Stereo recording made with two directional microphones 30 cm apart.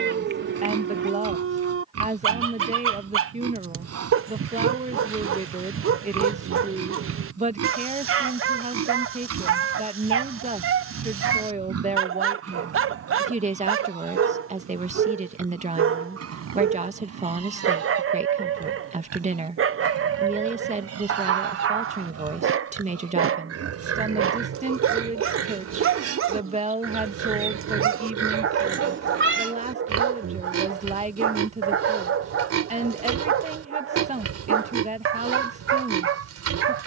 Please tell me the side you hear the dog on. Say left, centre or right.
right.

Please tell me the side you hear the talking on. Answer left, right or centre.
right.